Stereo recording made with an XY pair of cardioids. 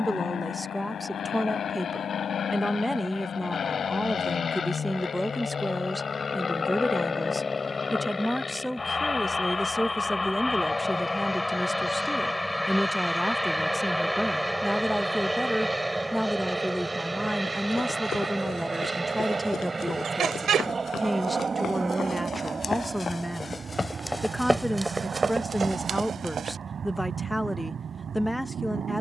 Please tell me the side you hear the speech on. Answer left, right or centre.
centre.